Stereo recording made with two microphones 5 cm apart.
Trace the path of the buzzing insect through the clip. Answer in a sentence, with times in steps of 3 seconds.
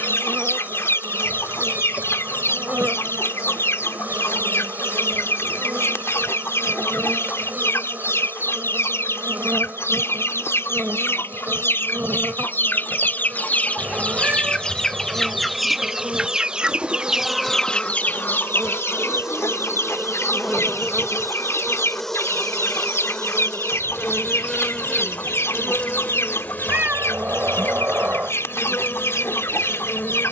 In this clip you hear the buzzing insect on the right from 0 s, in the centre from 18 s and on the left from 24 s.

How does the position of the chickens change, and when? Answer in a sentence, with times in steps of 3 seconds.
In this clip you hear the chickens on the left from 0 s, in the centre from 15 s and on the left from 18 s.